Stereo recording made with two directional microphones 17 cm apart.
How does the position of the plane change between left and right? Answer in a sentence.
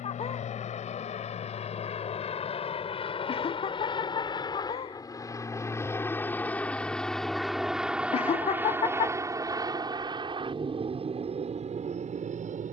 You can hear the plane move from left to right.